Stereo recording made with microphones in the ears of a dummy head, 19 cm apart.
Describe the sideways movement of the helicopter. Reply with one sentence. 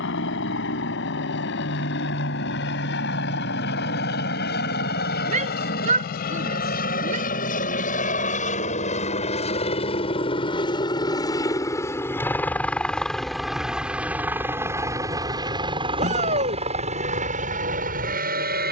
You can hear the helicopter travel towards the right.